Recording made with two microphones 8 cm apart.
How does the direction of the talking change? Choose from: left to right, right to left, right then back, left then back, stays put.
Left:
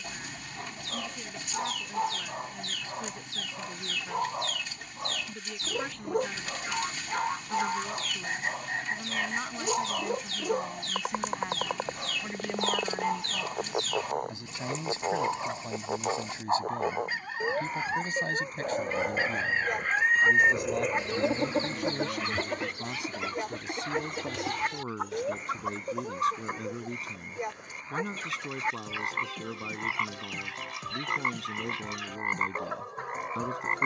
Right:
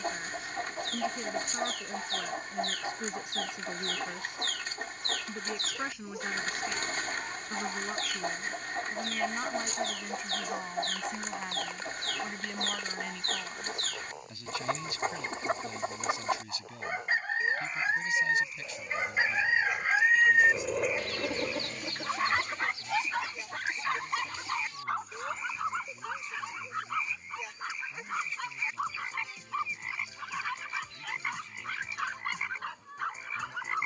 right to left.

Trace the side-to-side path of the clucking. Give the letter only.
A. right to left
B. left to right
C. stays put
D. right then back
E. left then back
A.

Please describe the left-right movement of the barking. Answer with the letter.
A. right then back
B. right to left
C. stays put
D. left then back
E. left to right
E.